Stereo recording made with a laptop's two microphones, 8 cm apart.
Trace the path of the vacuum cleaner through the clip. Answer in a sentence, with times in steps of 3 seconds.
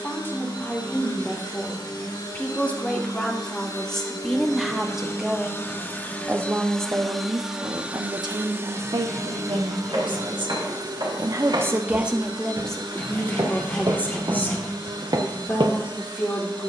In this clip you hear the vacuum cleaner on the left from 0 s, in the centre from 6 s and on the right from 9 s.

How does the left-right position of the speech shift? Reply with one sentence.
You can hear the speech move from left to right and back again.